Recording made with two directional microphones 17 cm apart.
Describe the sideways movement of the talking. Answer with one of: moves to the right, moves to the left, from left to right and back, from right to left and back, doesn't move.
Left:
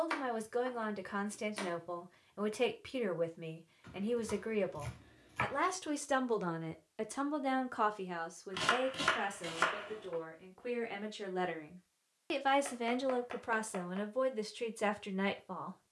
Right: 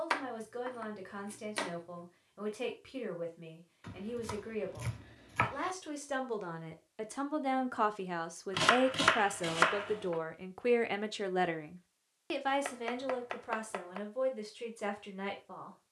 from left to right and back.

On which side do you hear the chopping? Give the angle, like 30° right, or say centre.
30° right.